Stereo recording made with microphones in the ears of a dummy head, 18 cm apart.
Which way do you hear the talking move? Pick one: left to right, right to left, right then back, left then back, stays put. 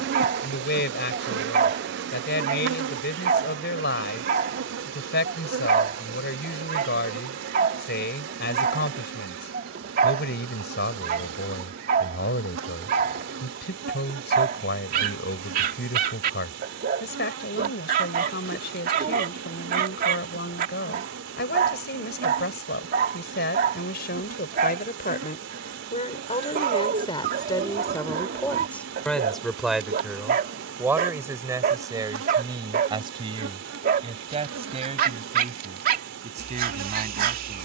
left to right.